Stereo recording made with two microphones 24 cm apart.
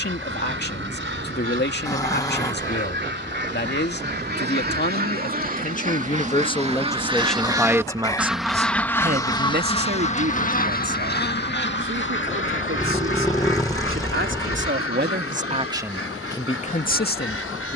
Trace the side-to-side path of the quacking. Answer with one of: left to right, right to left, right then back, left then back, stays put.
right to left.